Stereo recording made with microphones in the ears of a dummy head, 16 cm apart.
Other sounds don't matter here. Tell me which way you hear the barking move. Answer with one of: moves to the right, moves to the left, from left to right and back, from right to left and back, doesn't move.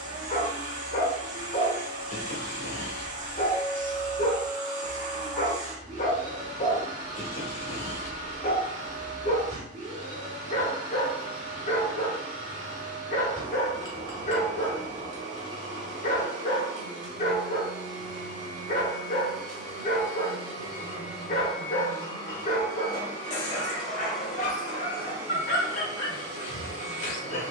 doesn't move.